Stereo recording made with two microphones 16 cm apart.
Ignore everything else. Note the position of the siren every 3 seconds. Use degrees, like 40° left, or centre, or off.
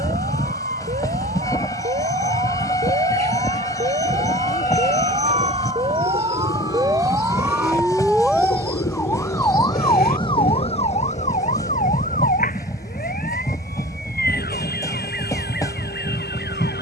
60° right, 40° right, 10° right, 30° left, 60° left, 70° left.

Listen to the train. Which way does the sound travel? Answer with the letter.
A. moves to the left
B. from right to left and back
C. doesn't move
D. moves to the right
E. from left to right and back
C.